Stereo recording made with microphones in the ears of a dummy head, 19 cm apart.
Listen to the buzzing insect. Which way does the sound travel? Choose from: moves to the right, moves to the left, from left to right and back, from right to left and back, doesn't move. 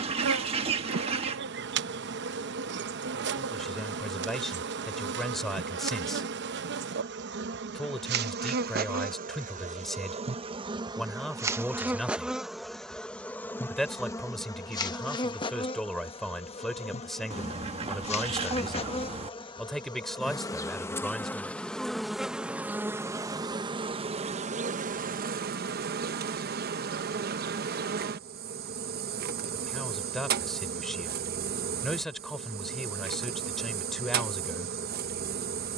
from right to left and back.